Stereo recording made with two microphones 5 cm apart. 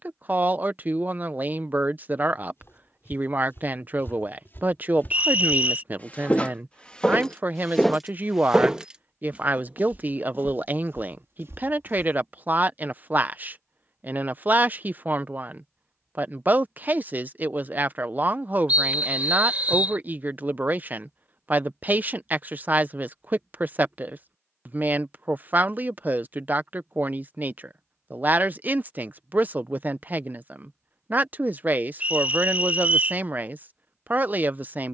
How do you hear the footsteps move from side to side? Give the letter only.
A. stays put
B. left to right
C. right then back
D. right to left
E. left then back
B.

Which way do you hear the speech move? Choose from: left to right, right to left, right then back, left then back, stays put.
stays put.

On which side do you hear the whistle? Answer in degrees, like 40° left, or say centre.
30° right.